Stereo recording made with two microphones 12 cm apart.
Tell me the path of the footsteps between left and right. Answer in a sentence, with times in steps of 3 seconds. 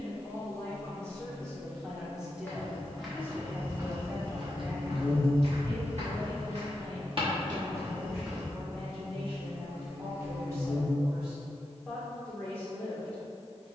You can hear the footsteps in the centre from 0 s, on the right from 3 s and not at all from 9 s.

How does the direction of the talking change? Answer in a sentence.
You can hear the talking go right and come back.